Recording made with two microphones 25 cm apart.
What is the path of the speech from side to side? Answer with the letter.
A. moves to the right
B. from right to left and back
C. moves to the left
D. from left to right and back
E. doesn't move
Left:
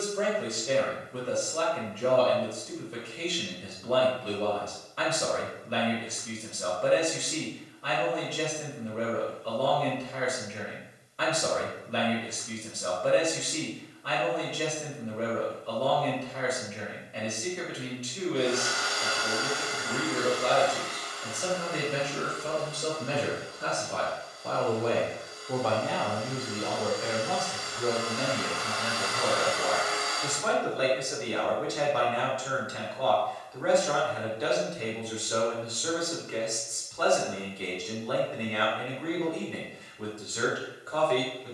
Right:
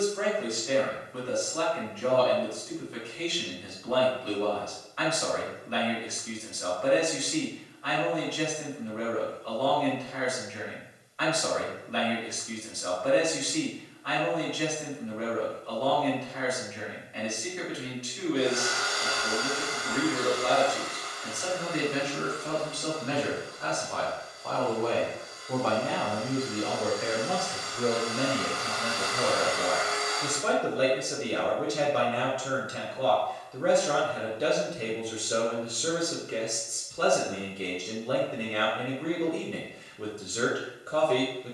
A.